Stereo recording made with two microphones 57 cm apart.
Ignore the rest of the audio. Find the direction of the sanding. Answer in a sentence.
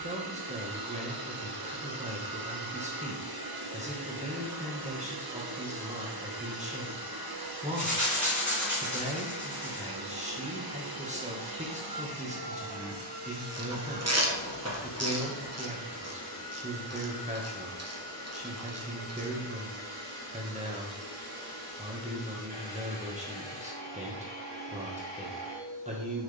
In this clip you hear the sanding on the left.